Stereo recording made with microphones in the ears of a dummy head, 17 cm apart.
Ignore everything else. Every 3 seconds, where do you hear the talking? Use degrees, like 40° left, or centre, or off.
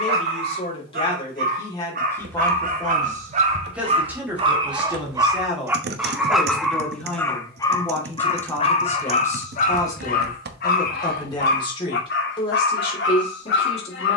20° left, 10° right, 10° left, 20° left, 30° left.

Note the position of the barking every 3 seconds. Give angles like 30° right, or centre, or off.
50° right, 30° right, 10° left, 50° left, 60° left.